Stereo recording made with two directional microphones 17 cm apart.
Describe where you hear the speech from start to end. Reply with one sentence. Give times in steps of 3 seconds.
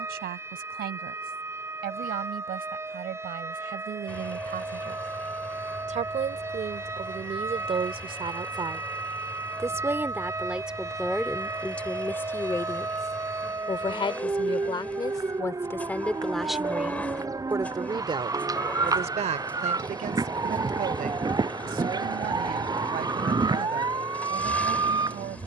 You can hear the speech on the right from 0 s, in the centre from 9 s, on the left from 12 s, in the centre from 15 s and on the right from 18 s.